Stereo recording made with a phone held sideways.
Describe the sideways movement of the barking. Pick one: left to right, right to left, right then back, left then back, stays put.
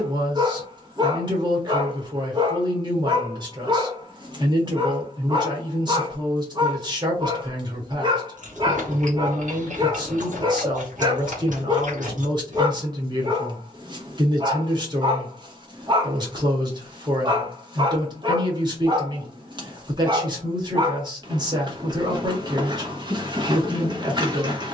stays put.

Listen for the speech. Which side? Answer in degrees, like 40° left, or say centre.
30° right.